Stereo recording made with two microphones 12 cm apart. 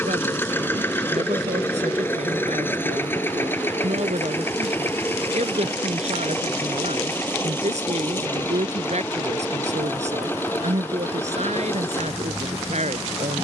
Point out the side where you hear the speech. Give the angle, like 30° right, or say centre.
70° right.